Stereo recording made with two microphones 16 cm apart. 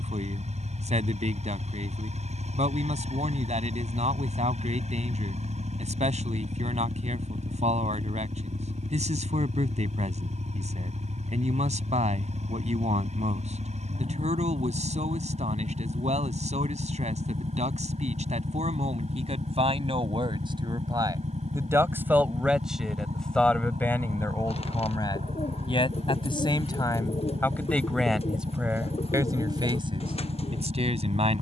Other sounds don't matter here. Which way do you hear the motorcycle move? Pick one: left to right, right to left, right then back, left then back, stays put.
stays put.